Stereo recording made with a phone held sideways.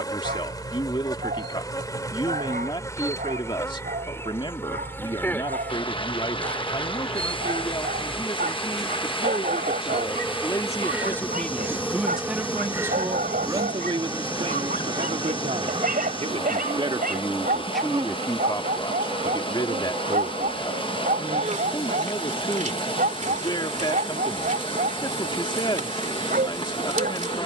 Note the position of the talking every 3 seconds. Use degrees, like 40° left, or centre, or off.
30° left, 30° left, 30° left, 20° left, 30° right, 30° right, 30° left, 30° left, 30° left.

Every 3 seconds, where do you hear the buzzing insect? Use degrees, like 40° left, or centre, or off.
20° left, 20° left, centre, 10° right, 20° right, 40° right, 50° right, 50° right, 50° right.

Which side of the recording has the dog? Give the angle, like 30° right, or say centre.
80° right.